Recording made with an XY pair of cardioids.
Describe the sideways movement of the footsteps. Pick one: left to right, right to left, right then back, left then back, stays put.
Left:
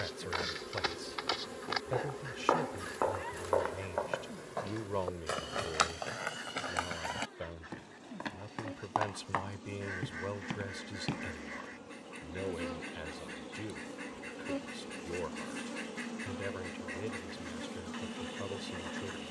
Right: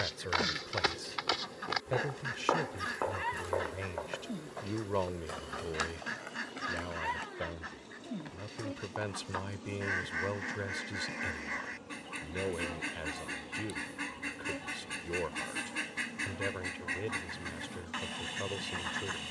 right to left.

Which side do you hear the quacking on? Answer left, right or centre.
right.